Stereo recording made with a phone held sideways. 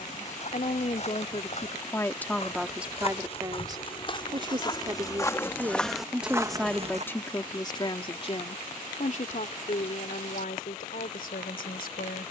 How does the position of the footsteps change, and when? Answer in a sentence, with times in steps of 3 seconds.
In this clip you hear the footsteps on the left from 0 s, on the right from 6 s and not at all from 9 s.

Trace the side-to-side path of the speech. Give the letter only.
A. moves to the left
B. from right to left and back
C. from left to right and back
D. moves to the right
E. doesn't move
C.